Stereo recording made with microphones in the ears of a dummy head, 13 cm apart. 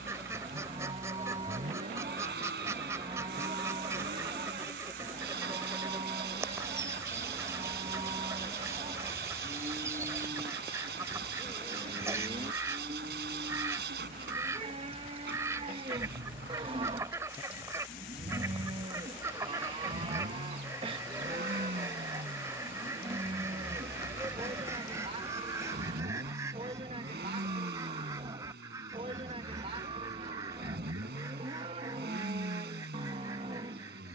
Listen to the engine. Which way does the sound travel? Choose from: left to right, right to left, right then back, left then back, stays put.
stays put.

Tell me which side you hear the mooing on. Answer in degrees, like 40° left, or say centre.
40° right.